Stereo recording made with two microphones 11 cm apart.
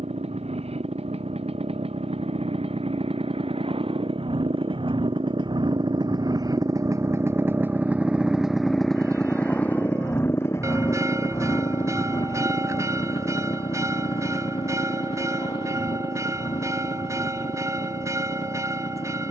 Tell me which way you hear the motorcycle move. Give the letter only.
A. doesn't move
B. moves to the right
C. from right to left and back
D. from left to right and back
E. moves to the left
E.